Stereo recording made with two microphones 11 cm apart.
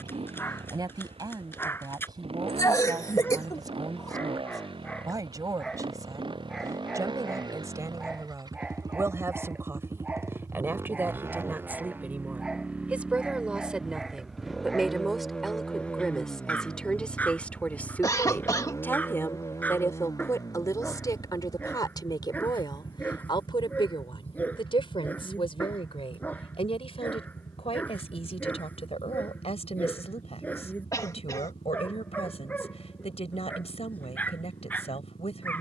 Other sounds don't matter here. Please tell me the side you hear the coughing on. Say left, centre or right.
left.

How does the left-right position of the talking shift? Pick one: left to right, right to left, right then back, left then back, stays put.
right to left.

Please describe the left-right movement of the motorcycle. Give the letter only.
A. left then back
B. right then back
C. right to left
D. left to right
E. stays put
C.